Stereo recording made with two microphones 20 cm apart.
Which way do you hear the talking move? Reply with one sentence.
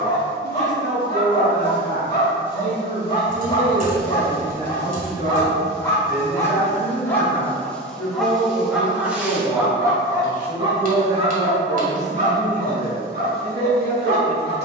In this clip you hear the talking go left and come back.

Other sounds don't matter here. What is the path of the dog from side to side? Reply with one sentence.
In this clip you hear the dog travel towards the right.